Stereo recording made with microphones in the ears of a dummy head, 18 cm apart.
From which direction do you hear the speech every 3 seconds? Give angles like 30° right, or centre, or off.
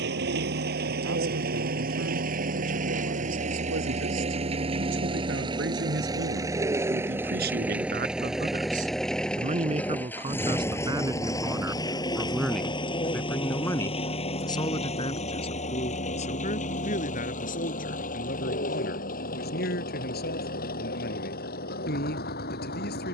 70° right, 60° right, 50° right, 20° right, 10° left, 40° left, 50° left, 50° left.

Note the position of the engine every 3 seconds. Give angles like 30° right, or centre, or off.
50° right, 30° right, 10° right, 10° left, 30° left, 40° left, 40° left, 50° left.